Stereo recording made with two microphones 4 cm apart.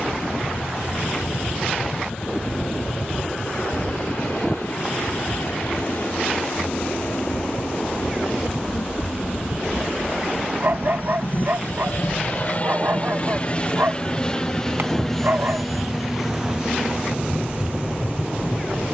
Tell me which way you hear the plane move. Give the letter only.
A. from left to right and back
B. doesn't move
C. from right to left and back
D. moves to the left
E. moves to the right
E.